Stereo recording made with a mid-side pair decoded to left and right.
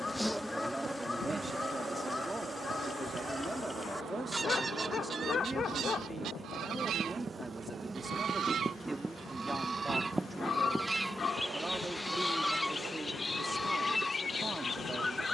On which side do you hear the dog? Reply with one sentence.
In this clip you hear the dog on the left.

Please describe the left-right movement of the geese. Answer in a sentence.
In this clip you hear the geese go right and come back.